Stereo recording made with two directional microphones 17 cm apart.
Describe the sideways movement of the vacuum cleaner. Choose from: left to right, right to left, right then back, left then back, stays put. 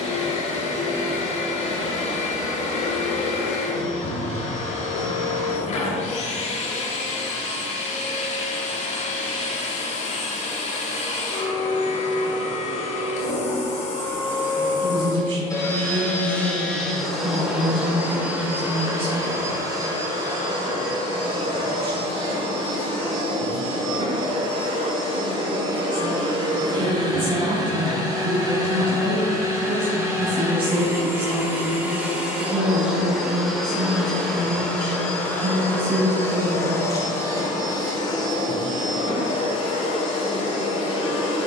right then back.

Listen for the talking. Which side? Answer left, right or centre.
right.